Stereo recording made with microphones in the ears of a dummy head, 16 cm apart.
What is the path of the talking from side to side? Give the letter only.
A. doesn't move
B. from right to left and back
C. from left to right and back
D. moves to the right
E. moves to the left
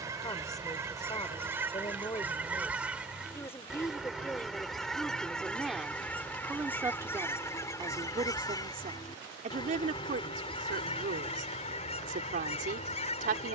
D.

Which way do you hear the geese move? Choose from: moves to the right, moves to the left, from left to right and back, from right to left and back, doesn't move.
moves to the left.